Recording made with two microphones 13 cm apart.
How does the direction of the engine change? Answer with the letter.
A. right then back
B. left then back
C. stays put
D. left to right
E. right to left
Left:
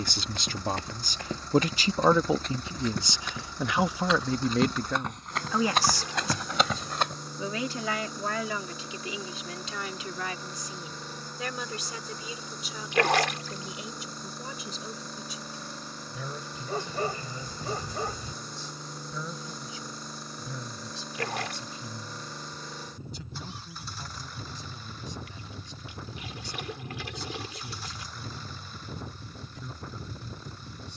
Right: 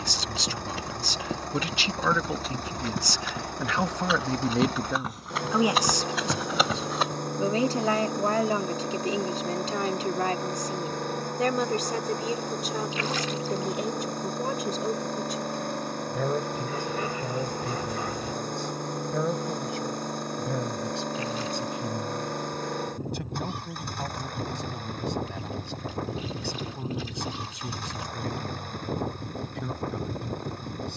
C.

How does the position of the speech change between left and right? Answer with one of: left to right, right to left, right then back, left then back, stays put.
left to right.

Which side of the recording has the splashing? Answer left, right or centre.
left.